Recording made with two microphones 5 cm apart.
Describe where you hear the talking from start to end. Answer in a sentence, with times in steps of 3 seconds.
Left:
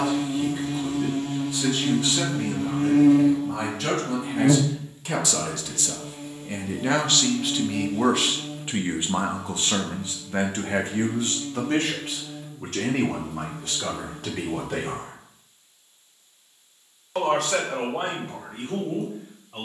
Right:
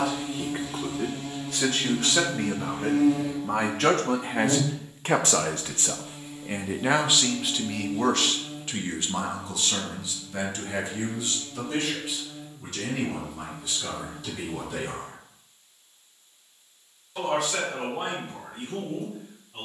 You can hear the talking on the right from 0 s, in the centre from 6 s and on the left from 9 s.